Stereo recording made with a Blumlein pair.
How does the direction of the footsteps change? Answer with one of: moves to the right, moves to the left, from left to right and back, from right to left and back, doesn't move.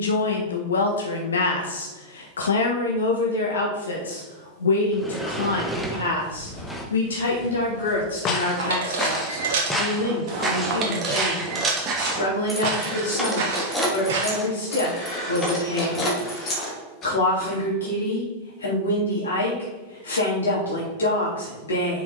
moves to the right.